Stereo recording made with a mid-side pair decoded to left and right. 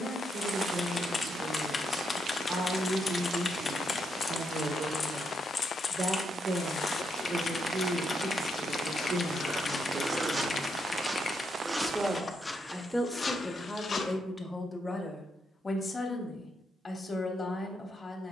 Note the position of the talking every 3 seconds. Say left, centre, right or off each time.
right, right, right, right, centre, left.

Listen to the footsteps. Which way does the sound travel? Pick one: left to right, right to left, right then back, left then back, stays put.
right then back.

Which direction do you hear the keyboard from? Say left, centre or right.
left.